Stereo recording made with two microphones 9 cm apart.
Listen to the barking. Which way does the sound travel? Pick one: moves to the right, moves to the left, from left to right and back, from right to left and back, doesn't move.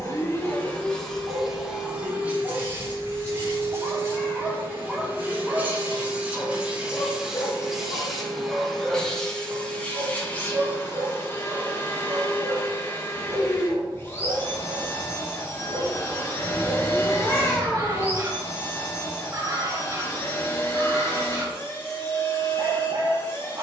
from right to left and back.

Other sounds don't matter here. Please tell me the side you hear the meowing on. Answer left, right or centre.
left.